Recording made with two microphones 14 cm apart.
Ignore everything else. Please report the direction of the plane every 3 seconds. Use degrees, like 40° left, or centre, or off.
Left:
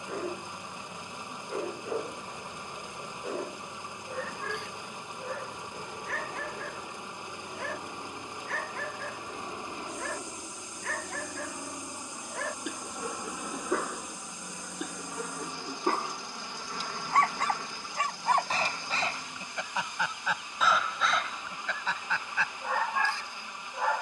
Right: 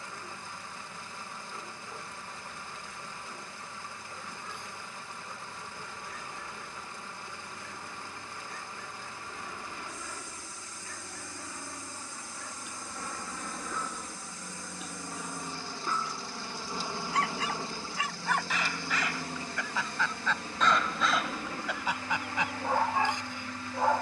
50° left, 40° left, 40° left, 30° left, 10° left, 10° right, 40° right, 60° right.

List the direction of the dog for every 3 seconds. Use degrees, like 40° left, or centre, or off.
70° left, 70° left, 70° left, 70° left, 70° left, 60° left, 20° left, 10° right.